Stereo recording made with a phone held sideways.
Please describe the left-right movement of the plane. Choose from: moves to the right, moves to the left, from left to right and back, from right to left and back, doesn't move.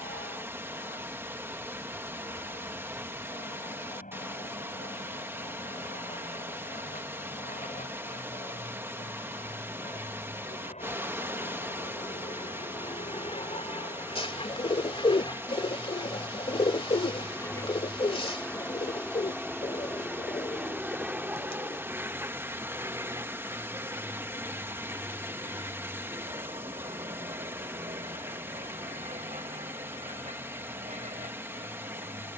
moves to the right.